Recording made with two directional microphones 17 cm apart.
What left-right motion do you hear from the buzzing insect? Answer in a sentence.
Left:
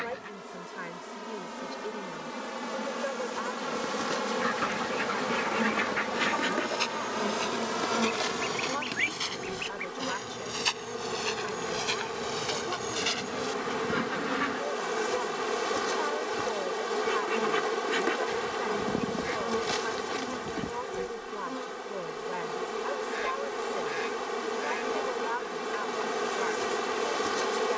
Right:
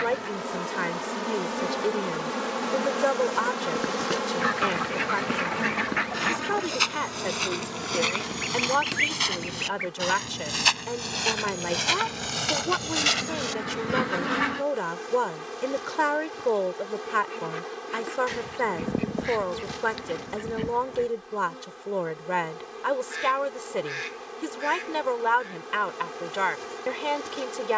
You can hear the buzzing insect go from the right side to the left.